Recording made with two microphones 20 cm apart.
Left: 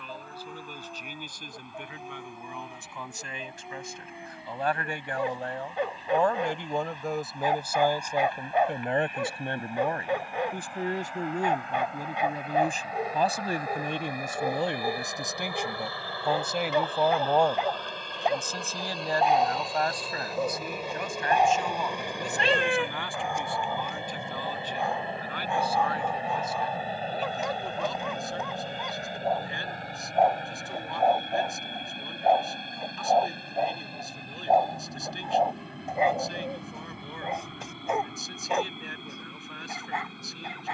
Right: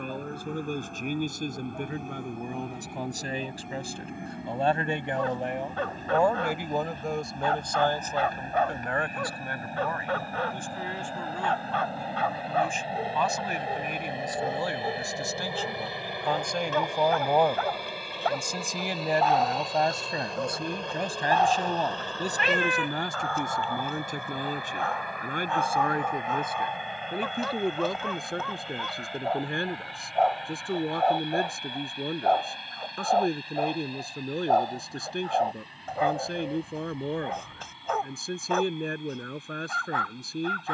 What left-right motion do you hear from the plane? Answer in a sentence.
You can hear the plane move to the left.